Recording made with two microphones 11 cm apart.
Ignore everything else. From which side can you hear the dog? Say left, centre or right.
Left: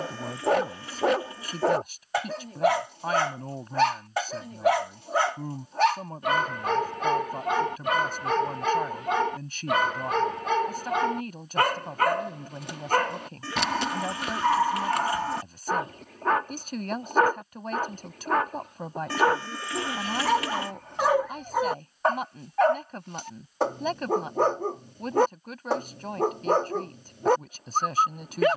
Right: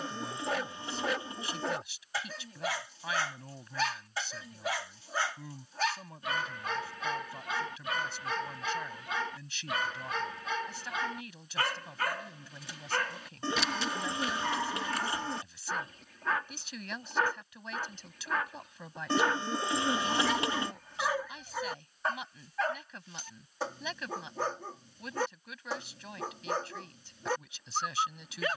left.